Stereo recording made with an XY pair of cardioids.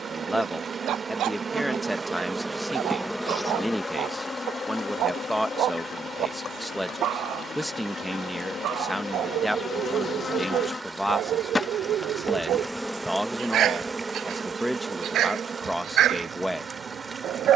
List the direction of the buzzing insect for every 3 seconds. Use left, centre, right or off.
right, left, left, left, centre, right.